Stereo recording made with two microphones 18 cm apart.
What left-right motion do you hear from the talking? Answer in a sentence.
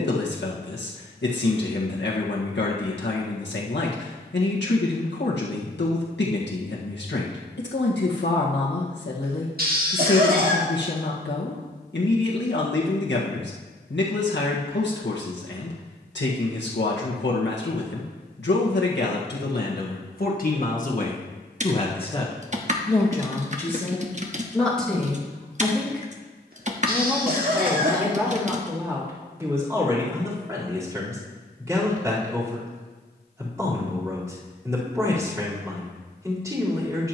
In this clip you hear the talking go from the left side to the right.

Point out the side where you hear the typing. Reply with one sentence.
In this clip you hear the typing on the right.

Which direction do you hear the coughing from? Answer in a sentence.
You can hear the coughing on the right.